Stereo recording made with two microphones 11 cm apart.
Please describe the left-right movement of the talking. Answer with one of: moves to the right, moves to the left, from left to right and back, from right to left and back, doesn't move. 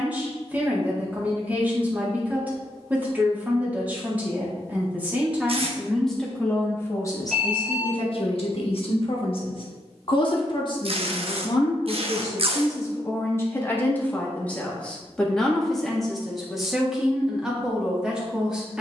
from right to left and back.